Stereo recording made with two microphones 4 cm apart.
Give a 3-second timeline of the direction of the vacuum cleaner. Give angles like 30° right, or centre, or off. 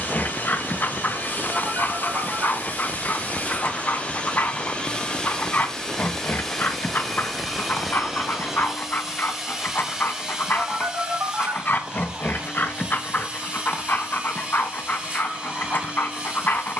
50° left, 30° left, centre, 10° right, 20° right, 30° right.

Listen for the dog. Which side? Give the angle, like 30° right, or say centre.
50° left.